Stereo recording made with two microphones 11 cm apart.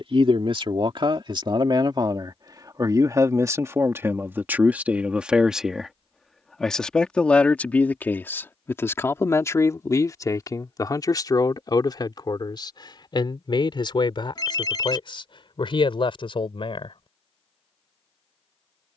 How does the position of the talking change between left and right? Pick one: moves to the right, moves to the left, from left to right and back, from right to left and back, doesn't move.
moves to the left.